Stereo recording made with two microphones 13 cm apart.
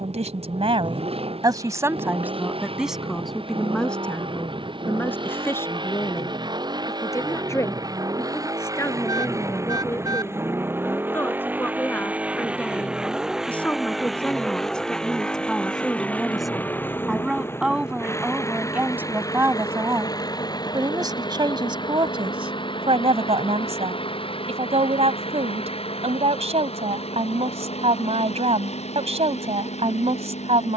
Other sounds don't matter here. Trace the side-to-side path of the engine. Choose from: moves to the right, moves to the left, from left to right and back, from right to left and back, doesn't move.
moves to the left.